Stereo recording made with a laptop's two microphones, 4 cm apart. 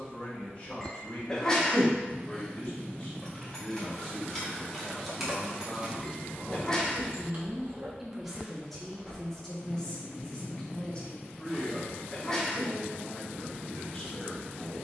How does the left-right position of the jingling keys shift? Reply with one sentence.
You can hear the jingling keys go right and come back.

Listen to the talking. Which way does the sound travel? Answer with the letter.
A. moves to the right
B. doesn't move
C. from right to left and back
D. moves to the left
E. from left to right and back
E.